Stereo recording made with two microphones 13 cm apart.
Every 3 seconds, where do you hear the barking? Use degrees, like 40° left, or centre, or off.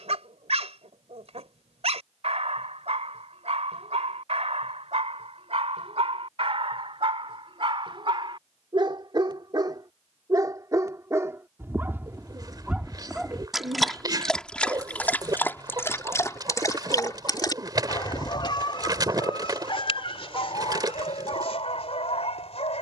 60° right, 60° right, 50° right, 30° right, centre, 20° left, 40° left, 60° left.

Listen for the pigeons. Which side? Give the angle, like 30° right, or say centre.
30° right.